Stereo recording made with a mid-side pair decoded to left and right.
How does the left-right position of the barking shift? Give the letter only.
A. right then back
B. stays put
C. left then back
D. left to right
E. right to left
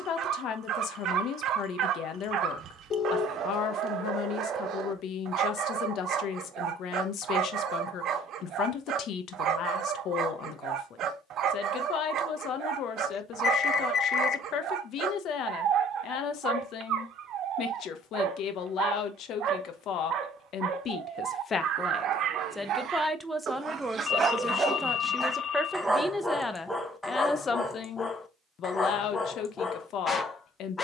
E.